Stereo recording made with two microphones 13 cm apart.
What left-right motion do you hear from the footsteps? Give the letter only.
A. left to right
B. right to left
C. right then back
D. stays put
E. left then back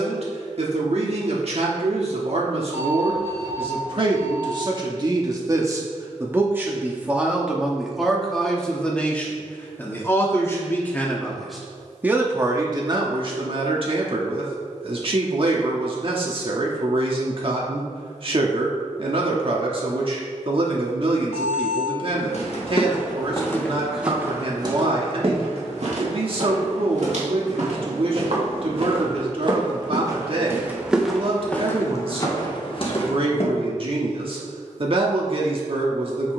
C.